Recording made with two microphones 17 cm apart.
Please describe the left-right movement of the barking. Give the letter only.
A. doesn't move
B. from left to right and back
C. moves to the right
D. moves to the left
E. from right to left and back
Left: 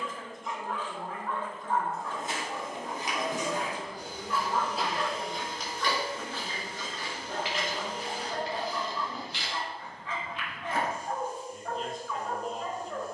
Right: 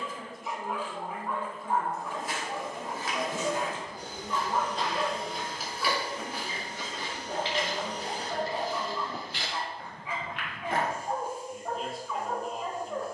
A.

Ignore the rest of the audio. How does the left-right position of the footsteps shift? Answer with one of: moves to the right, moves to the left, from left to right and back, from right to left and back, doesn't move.
moves to the right.